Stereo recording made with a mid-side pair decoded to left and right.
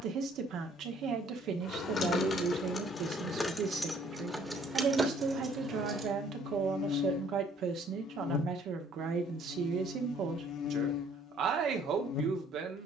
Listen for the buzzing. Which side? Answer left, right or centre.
left.